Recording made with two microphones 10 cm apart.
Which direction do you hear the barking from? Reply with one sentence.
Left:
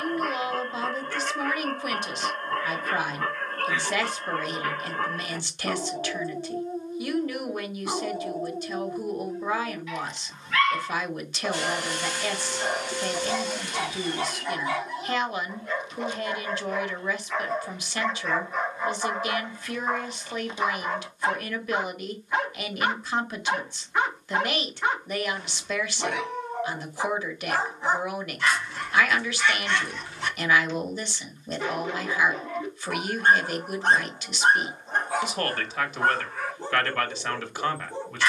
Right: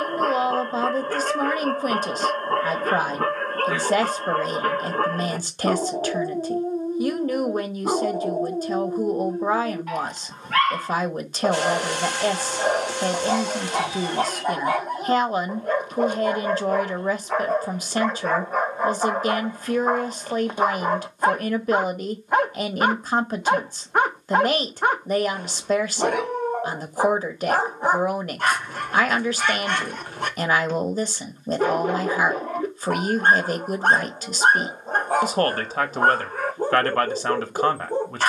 In this clip you hear the barking on the right.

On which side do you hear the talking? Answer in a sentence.
You can hear the talking on the right.